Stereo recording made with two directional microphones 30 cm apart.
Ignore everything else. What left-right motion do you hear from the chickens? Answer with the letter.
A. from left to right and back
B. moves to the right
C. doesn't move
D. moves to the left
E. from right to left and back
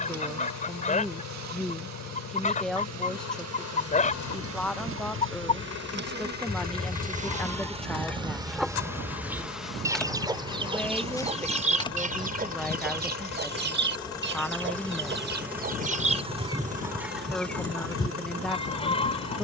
A.